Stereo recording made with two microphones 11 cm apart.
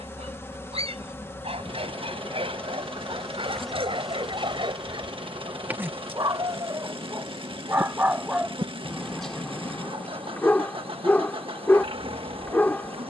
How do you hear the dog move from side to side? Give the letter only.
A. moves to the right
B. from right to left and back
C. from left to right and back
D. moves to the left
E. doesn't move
D.